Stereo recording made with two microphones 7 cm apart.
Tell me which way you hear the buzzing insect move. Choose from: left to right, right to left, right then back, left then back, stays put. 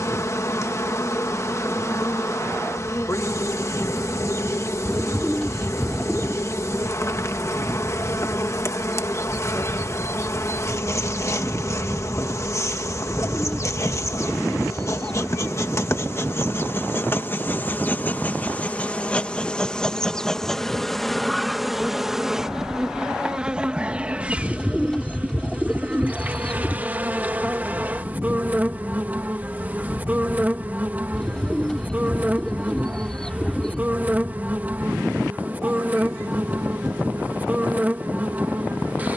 left to right.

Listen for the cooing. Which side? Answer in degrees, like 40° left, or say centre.
10° left.